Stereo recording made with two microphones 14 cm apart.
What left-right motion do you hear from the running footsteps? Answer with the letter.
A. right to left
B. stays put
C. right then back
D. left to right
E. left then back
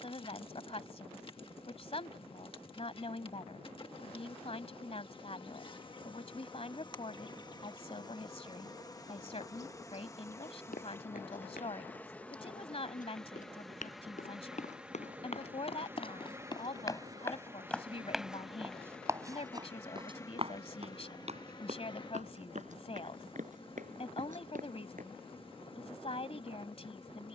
D.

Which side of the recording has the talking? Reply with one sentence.
In this clip you hear the talking on the left.